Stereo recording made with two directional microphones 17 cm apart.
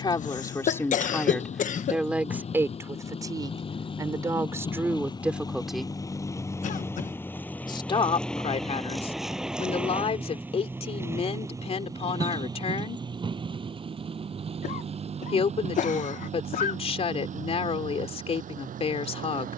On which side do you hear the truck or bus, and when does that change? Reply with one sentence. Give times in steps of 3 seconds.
In this clip you hear the truck or bus on the left from 0 s, in the centre from 6 s and on the right from 12 s.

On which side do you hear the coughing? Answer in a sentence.
You can hear the coughing on the left.